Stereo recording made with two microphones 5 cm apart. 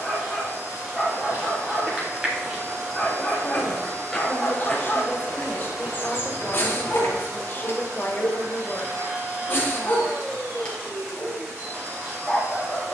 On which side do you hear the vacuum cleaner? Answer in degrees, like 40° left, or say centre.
70° right.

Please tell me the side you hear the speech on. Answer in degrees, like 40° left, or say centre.
40° left.